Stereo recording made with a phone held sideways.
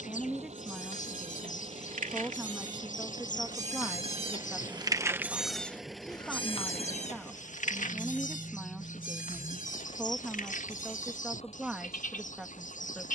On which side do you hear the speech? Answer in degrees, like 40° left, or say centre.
10° right.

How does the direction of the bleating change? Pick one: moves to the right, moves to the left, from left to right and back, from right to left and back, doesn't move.
moves to the left.